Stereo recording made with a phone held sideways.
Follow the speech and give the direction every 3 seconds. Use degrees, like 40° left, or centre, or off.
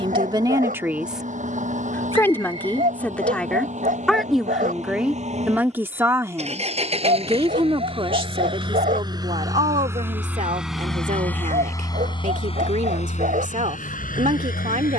10° right, centre, 30° right, 50° right, 60° right.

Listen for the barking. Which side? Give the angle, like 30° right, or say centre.
70° right.